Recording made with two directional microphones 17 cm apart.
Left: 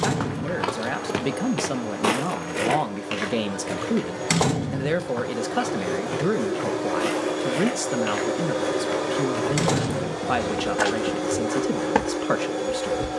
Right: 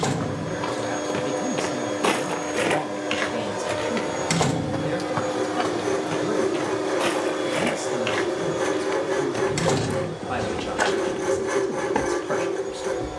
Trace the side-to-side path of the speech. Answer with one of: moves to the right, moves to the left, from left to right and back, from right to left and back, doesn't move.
doesn't move.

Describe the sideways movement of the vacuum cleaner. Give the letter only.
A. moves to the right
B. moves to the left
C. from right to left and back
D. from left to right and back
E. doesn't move
B.